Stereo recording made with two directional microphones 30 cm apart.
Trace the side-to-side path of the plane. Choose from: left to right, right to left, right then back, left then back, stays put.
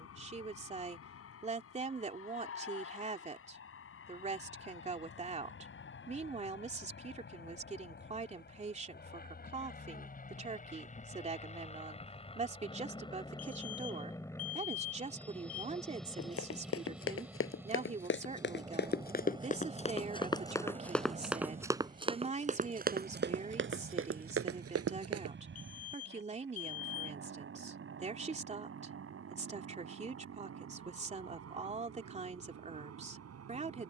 left to right.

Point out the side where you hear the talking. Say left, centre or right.
right.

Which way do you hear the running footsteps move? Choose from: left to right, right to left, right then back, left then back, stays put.
left to right.